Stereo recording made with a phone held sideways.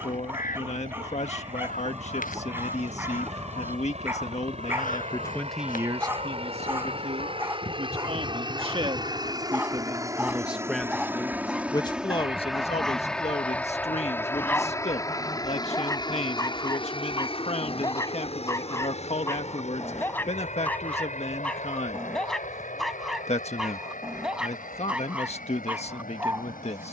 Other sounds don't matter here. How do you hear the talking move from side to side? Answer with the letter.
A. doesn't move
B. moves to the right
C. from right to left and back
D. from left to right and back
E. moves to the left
D.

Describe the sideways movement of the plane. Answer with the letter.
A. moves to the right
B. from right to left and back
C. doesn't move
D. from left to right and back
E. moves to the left
E.